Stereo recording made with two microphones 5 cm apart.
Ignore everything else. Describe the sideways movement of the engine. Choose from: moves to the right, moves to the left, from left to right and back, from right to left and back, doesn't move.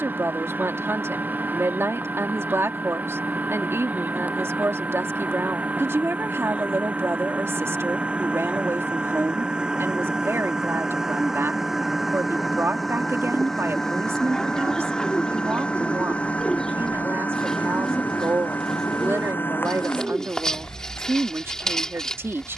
moves to the left.